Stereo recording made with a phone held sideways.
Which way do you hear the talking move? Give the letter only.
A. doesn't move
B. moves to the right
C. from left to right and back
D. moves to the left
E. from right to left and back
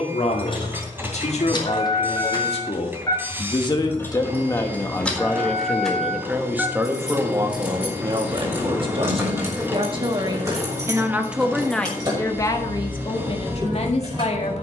C.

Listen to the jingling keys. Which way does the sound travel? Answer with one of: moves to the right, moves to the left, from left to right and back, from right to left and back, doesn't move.
moves to the right.